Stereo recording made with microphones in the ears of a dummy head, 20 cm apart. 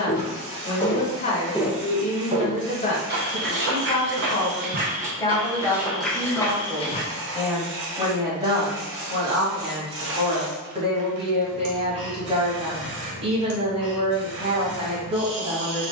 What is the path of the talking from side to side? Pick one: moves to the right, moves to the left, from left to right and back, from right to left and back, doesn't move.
moves to the right.